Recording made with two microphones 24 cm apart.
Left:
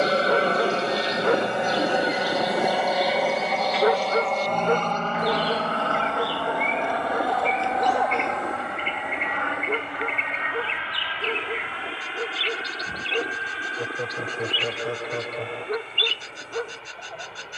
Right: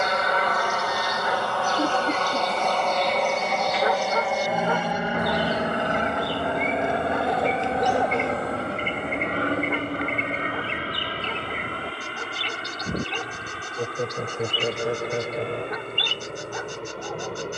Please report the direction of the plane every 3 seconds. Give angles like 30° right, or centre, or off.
20° left, 10° right, 30° right, 40° right, 40° right, 50° right.